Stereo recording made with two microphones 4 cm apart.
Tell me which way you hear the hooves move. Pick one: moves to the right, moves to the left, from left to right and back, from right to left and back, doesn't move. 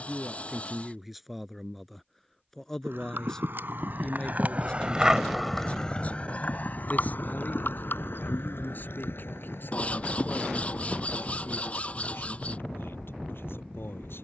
moves to the left.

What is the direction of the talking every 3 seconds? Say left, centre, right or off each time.
centre, left, left, left, left.